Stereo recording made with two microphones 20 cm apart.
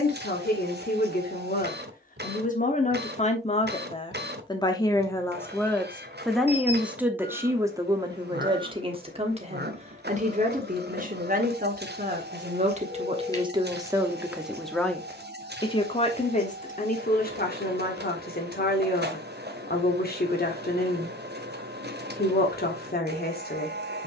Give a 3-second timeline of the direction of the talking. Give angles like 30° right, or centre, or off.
50° left, 20° left, 10° right, 40° right, 20° right, 40° left, 50° left, 50° left.